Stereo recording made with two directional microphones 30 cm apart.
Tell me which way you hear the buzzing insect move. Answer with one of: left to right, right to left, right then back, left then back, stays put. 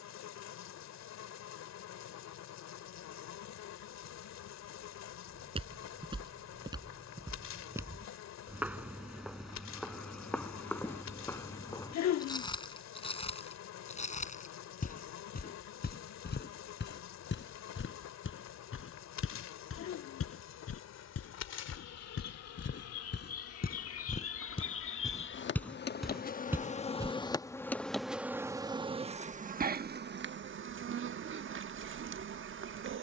left to right.